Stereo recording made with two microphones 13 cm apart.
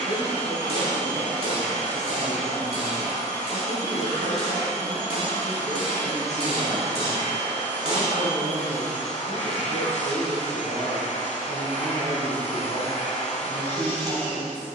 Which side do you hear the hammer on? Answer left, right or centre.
right.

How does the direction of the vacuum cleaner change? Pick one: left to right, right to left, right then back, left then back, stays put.
stays put.